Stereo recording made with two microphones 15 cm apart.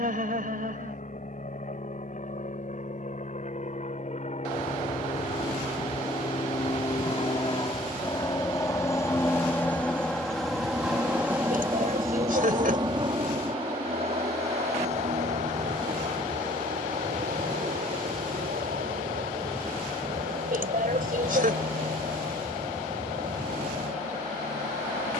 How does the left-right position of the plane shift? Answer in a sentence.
In this clip you hear the plane move from left to right.